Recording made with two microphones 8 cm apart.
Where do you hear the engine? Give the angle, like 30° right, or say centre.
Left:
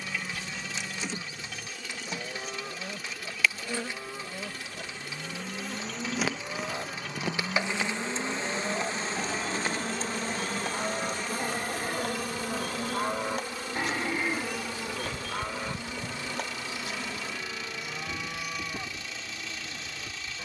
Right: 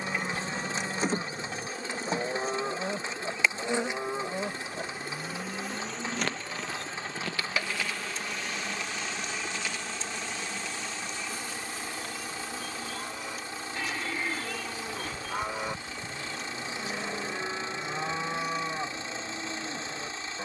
30° right.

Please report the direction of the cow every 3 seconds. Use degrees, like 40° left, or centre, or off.
30° right, 20° right, 50° left, 70° left, 40° left, 20° right, 30° right.